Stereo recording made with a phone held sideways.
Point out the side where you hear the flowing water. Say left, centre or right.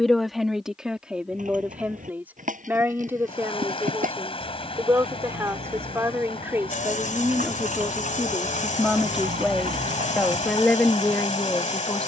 left.